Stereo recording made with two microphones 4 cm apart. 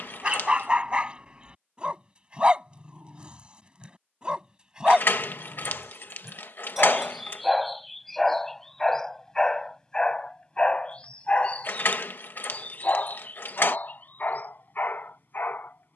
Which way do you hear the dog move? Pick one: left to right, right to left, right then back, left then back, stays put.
right to left.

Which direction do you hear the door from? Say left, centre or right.
left.